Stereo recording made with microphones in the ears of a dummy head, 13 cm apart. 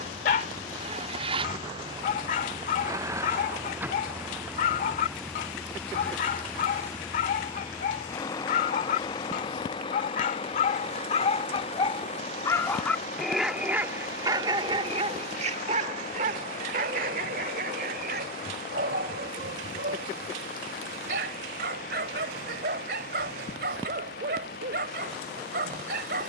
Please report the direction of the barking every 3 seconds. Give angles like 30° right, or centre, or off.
50° left, 50° left, 50° left, 50° left, 10° right, 50° right, 70° right, 70° right, 70° right.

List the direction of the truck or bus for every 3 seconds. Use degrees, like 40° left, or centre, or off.
30° right, 10° right, 20° left, 30° left, 40° left, 50° left, 60° left, 60° left, 60° left.